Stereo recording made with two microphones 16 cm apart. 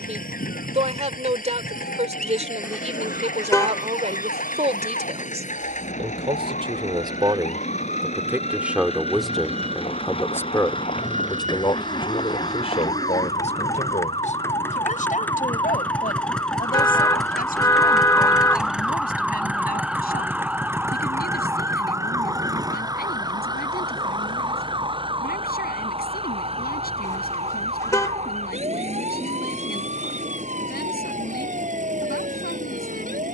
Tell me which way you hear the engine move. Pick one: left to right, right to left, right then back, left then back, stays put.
left to right.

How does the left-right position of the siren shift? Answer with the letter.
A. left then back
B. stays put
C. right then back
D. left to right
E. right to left
D.